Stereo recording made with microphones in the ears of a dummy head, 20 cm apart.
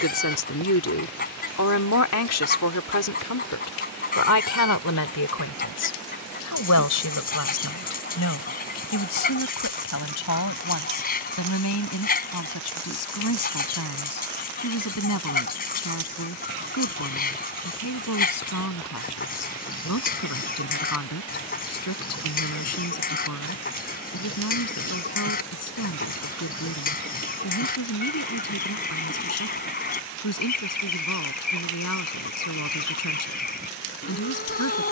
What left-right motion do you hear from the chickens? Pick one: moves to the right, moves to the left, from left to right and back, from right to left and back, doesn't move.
doesn't move.